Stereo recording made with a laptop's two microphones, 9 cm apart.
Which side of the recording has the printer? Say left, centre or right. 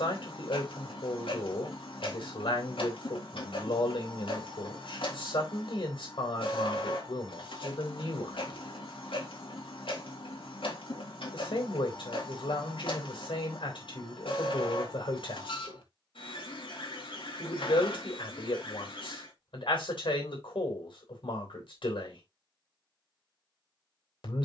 left.